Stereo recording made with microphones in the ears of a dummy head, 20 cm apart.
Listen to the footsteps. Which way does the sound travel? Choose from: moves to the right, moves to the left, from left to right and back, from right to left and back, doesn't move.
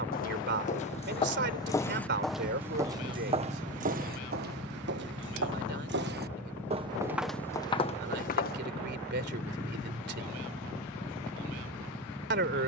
from left to right and back.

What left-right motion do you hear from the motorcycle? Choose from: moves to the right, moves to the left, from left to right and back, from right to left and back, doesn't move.
doesn't move.